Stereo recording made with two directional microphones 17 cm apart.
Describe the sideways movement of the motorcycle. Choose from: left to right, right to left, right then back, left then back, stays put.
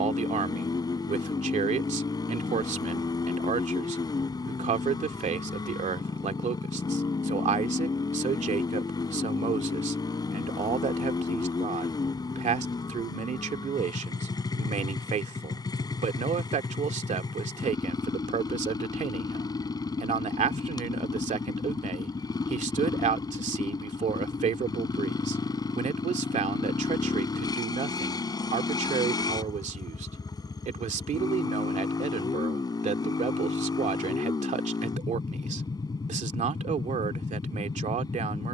stays put.